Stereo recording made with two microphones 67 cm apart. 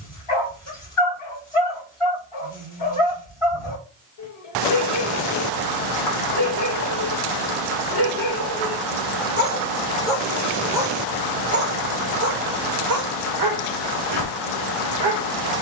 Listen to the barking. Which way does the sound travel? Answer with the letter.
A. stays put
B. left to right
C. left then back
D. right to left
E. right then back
B.